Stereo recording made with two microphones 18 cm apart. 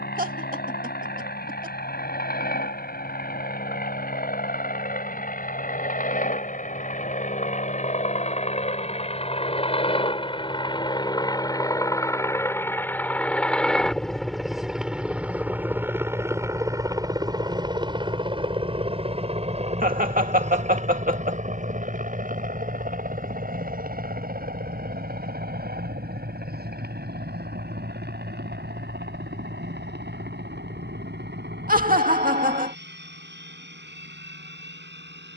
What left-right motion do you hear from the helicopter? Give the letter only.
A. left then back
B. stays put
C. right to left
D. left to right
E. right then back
D.